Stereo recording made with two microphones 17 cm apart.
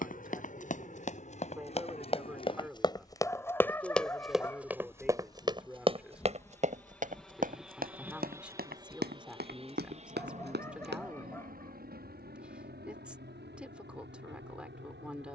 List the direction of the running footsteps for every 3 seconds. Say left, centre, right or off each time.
left, centre, right, right, off.